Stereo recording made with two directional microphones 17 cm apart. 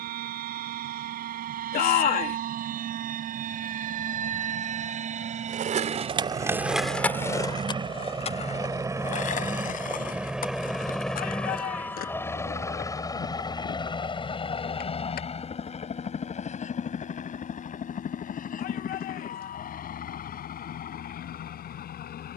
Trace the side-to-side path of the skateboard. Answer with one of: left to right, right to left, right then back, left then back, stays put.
right to left.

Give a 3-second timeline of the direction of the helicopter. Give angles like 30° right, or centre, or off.
60° right, 50° right, 30° right, centre, 20° left, 40° left, 50° left, 60° left.